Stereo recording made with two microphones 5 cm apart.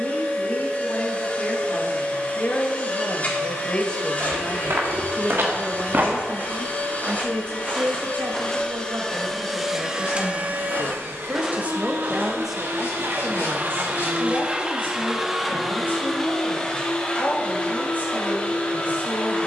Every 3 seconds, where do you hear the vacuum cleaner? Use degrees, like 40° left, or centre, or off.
30° left, 30° left, 30° left, 30° right, 40° right, 10° left, 30° left.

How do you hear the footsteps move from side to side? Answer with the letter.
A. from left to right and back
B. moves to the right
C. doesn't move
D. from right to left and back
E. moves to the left
D.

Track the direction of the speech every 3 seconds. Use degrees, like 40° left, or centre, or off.
40° left, 10° left, 50° right, 50° right, 20° left, 40° left, 40° left.